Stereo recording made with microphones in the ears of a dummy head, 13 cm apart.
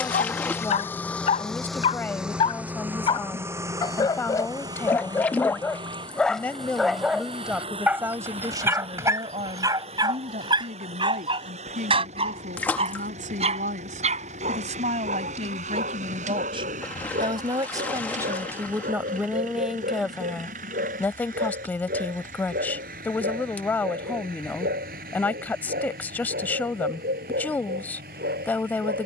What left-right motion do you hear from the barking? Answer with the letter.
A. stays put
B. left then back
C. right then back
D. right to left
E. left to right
E.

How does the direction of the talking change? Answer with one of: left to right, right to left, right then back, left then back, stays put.
right then back.